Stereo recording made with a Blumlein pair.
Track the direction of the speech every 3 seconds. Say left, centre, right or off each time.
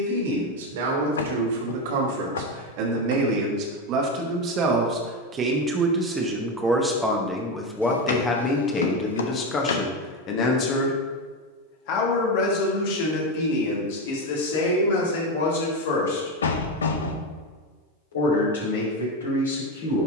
right, right, centre, left, left, left, left.